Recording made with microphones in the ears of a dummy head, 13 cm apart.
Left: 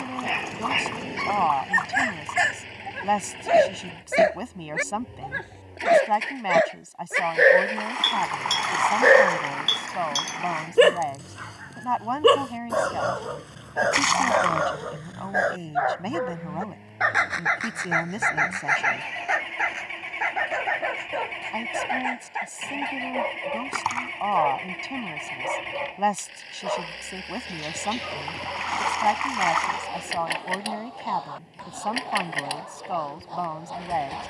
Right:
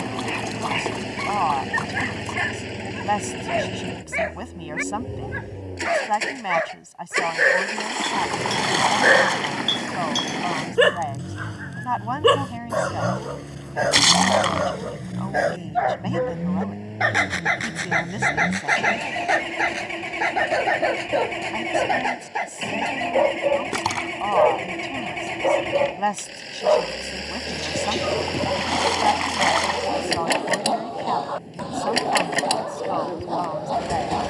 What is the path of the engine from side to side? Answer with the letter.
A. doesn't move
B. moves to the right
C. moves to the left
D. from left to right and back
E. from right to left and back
A.